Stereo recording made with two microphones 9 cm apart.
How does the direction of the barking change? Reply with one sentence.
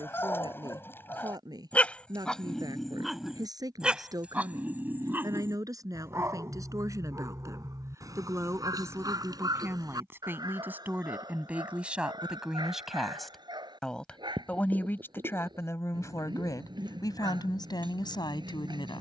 You can hear the barking travel towards the right.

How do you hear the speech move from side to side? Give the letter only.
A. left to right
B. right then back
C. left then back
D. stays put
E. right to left
E.